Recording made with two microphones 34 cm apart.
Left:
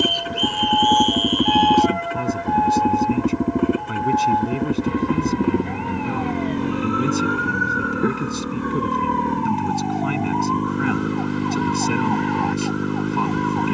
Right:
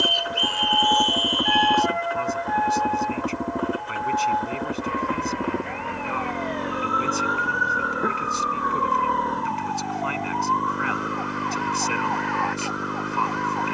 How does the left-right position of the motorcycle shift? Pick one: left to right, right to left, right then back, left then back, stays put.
stays put.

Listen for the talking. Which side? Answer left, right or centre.
left.